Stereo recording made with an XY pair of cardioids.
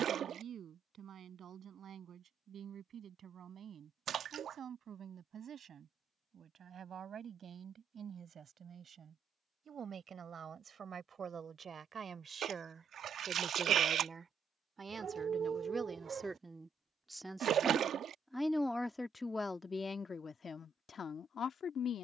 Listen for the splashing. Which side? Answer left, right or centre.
right.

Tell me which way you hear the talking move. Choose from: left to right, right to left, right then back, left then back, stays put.
right to left.